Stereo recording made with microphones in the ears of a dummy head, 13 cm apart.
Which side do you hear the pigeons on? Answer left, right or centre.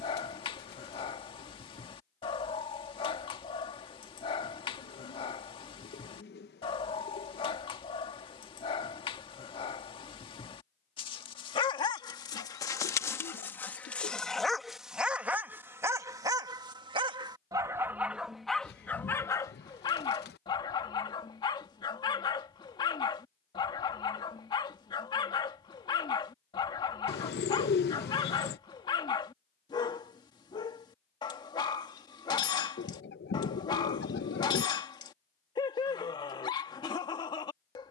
left.